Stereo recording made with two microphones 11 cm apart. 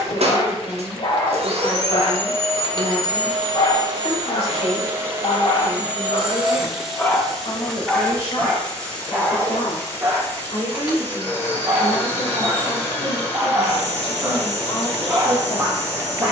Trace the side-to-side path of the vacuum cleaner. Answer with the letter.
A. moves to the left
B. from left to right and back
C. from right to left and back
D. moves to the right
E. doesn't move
A.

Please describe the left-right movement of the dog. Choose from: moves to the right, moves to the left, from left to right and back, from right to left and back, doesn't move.
moves to the right.